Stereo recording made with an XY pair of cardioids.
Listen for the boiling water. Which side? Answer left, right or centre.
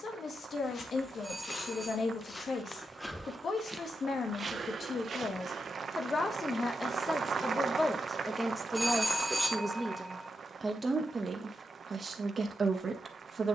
right.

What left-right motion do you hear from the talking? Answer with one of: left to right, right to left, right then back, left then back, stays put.
left to right.